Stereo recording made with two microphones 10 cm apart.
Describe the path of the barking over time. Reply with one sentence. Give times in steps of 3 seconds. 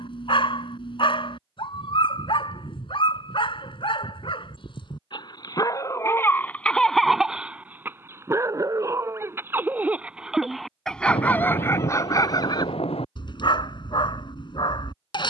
In this clip you hear the barking on the left from 0 s, in the centre from 6 s and on the left from 12 s.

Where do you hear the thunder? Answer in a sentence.
In this clip you hear the thunder on the left.